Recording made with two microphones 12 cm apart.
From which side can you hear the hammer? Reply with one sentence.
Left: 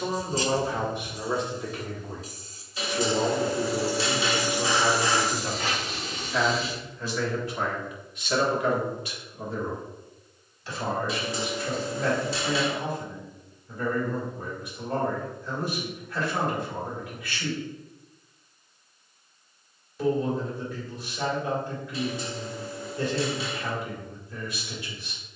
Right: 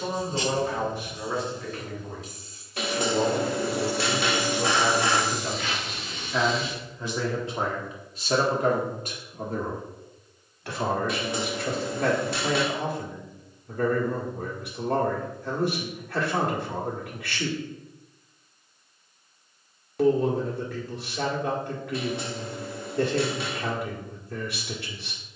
You can hear the hammer on the right.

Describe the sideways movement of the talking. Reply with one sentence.
You can hear the talking travel towards the right.